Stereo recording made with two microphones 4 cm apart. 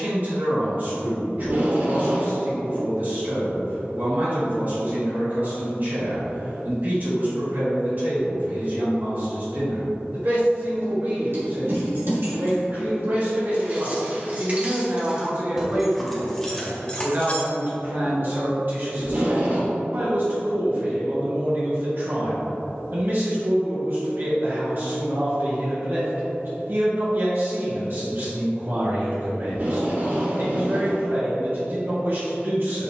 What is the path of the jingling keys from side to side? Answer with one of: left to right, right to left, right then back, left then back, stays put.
right to left.